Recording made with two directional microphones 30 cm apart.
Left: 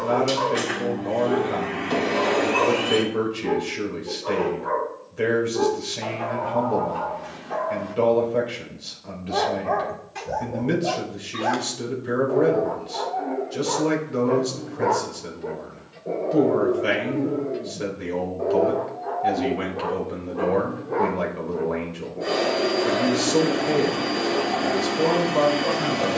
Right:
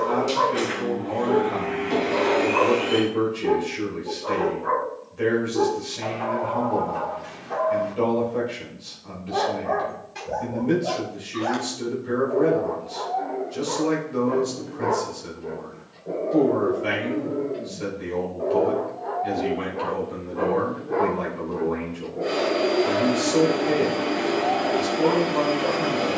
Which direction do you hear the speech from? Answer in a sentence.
You can hear the speech on the left.